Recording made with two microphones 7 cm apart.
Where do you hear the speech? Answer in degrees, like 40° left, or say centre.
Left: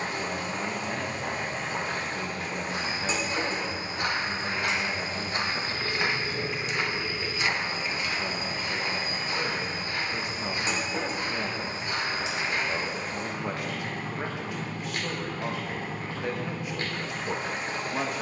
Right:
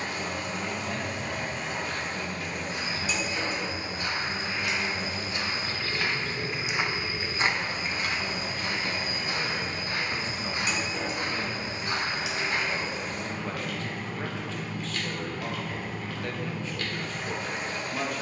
20° left.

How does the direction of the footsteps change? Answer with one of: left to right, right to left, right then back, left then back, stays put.
left to right.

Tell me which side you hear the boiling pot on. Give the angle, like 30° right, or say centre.
30° left.